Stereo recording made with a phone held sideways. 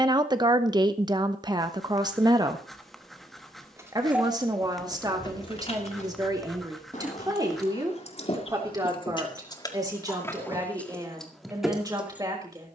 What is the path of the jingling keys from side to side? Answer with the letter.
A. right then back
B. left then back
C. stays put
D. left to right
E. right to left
B.